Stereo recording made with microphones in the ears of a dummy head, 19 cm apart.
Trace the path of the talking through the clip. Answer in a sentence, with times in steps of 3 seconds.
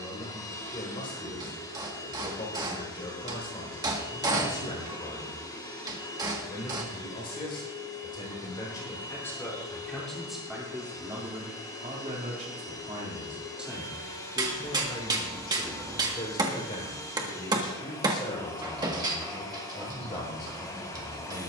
You can hear the talking on the left from 0 s, in the centre from 9 s and on the left from 15 s.